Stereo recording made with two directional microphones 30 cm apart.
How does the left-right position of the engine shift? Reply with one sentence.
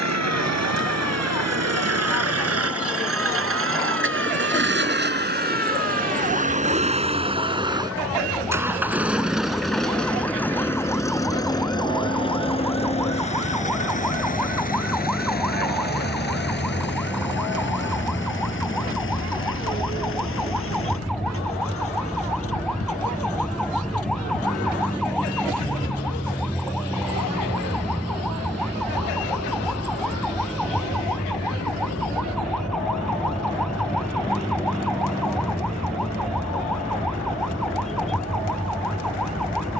In this clip you hear the engine move from right to left.